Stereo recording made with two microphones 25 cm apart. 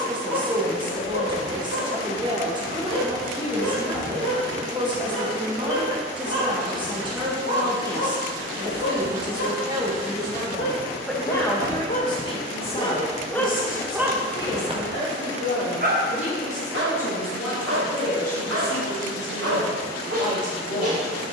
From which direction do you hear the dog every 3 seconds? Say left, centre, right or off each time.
left, left, left, left, centre, right, right.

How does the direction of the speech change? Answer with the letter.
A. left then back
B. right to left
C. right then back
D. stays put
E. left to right
B.